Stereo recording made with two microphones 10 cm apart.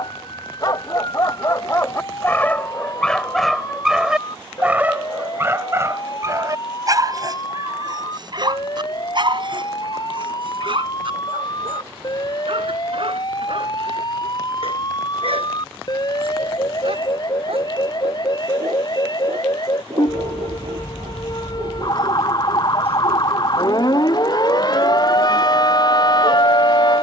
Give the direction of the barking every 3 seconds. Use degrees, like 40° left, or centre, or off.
30° left, 10° right, 40° right, 50° right, 60° right, 70° right, 70° right, 70° right, 70° right.